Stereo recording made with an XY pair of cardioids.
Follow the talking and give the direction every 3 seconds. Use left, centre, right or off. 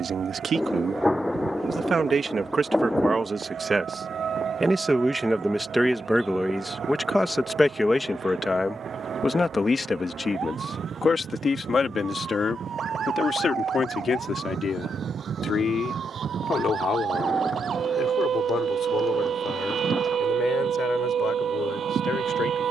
right, right, centre, left, left, left, left, left.